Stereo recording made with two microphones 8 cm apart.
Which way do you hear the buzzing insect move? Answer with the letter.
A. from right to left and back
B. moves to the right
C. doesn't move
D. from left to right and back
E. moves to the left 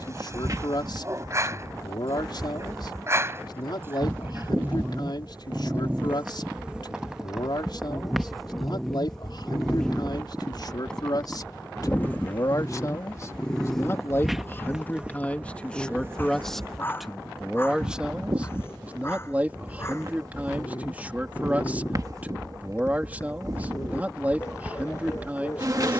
A.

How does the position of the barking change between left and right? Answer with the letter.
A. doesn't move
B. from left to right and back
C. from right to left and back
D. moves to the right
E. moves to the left
E.